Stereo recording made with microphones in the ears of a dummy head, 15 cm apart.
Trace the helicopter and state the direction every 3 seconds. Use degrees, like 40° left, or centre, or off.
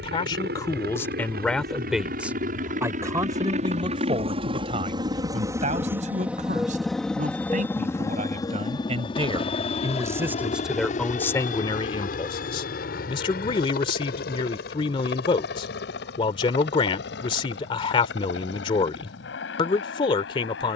60° right, 30° right, 10° left, 40° left, 50° left, 60° left, 60° left.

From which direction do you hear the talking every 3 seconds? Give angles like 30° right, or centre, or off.
10° left, 30° right, 40° right, centre, 30° left, 30° left, 30° left.